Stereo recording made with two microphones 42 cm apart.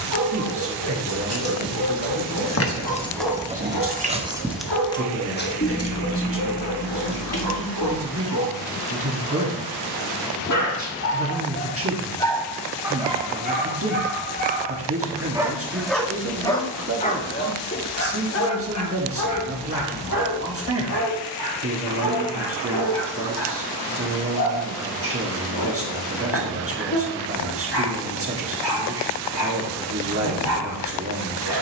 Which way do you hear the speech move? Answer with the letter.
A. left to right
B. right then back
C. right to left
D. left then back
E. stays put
E.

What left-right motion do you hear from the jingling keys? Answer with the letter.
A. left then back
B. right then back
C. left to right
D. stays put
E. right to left
B.